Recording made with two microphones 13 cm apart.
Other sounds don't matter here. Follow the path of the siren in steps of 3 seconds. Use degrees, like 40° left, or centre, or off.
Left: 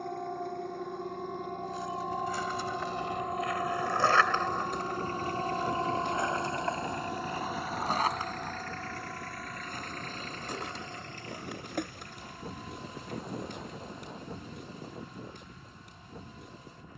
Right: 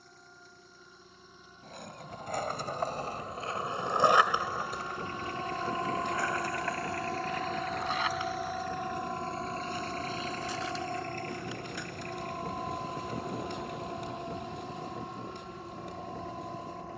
70° left, 30° left, 10° right, 40° right, 50° right, 50° right.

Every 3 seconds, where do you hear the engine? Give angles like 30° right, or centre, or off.
60° left, 40° left, 10° left, 40° right, 60° right, 70° right.